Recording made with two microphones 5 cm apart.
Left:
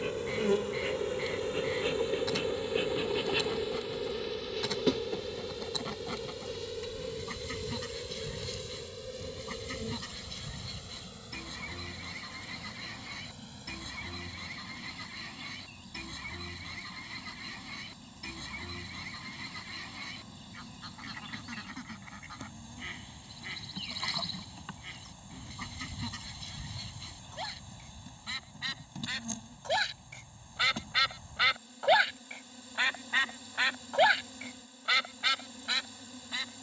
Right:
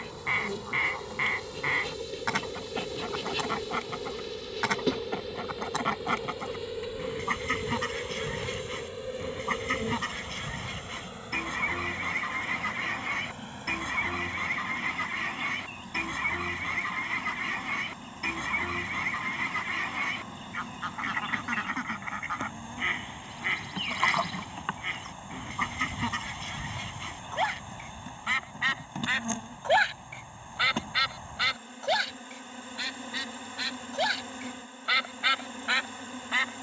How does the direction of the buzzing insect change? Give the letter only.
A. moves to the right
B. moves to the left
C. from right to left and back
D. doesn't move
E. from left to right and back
A.